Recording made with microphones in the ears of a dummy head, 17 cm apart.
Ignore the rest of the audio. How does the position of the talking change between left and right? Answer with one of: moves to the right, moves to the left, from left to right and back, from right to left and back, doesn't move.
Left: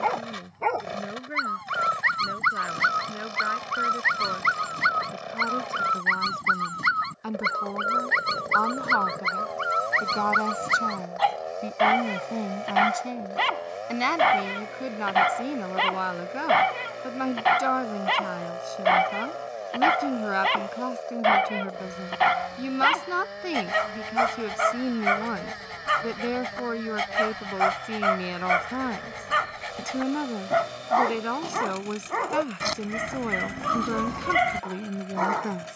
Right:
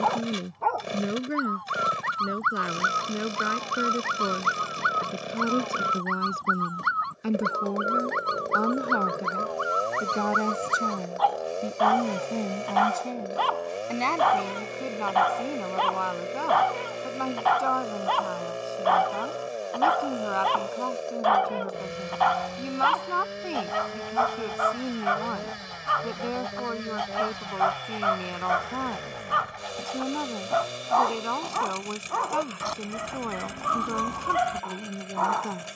moves to the left.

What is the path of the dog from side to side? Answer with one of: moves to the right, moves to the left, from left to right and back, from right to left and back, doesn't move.
doesn't move.